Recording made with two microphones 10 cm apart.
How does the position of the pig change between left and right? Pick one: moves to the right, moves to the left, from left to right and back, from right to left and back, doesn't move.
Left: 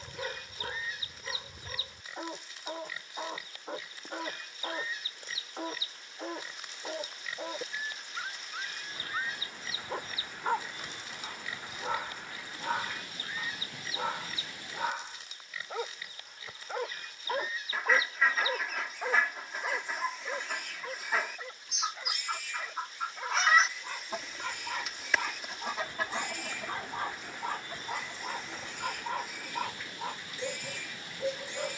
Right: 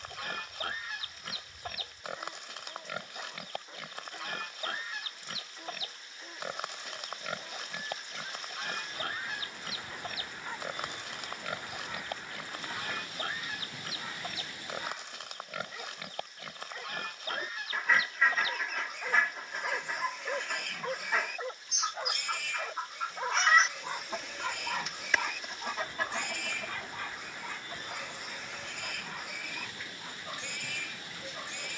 doesn't move.